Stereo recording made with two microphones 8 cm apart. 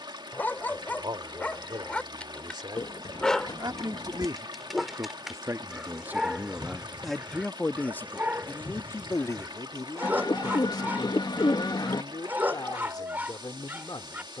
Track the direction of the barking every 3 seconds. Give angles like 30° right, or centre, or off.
20° left, centre, 20° right, 20° right, 20° right.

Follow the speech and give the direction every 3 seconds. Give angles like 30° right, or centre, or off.
70° right, 50° right, 10° left, 50° left, 60° left.